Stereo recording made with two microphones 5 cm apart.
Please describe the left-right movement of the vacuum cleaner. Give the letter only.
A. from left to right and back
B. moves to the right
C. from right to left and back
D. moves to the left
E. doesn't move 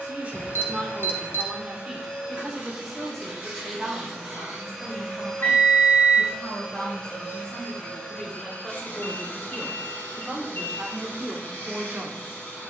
D.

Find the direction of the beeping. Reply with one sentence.
In this clip you hear the beeping on the left.